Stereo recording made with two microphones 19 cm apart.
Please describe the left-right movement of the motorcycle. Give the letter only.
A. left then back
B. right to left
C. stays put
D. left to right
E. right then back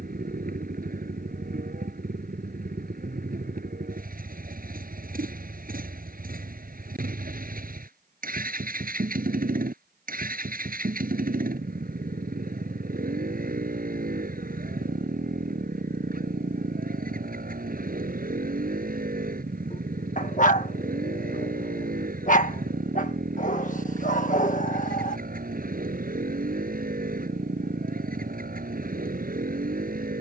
C.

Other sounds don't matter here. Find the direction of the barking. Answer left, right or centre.
left.